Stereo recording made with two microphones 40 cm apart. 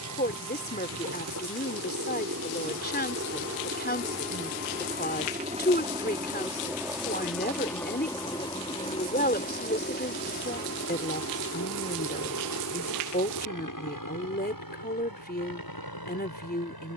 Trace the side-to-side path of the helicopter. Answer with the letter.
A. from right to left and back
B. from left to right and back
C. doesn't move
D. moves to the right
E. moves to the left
E.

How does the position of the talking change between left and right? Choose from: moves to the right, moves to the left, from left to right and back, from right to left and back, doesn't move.
doesn't move.